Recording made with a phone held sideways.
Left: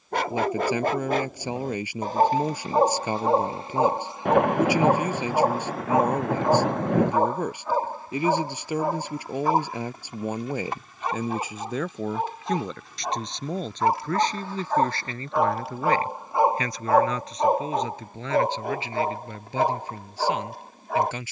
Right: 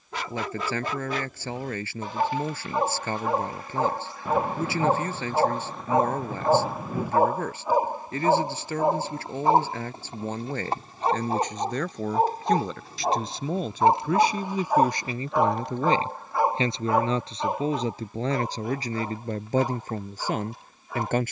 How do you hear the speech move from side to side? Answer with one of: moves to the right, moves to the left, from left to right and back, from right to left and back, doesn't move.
moves to the right.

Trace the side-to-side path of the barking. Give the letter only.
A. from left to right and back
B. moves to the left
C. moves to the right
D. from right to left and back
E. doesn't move
A.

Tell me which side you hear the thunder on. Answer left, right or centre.
left.